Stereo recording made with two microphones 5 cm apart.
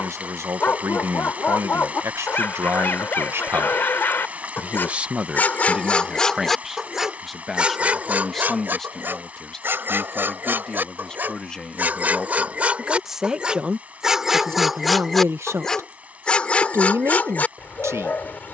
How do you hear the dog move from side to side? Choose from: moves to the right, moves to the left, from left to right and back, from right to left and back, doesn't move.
from left to right and back.